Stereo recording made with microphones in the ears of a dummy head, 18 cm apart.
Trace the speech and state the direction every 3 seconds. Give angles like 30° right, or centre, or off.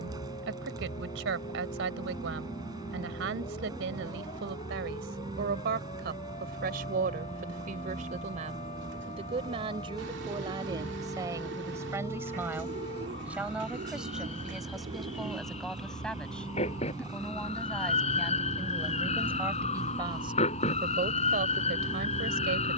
70° right, 70° right, 50° right, 20° right, 10° right, centre, 10° right, 60° right.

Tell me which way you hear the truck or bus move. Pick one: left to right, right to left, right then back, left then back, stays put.
stays put.